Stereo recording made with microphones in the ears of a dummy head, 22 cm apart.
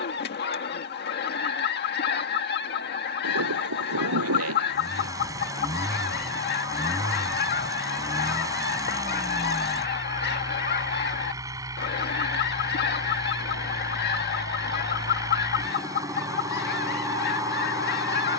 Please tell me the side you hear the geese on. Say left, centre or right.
left.